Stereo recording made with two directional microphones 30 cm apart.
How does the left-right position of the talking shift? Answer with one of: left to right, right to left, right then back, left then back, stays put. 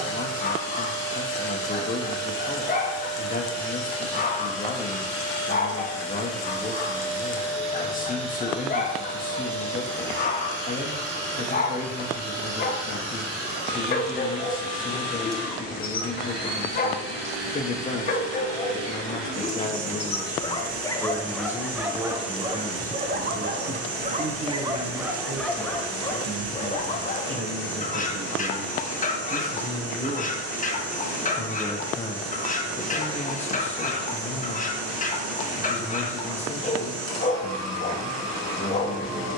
right then back.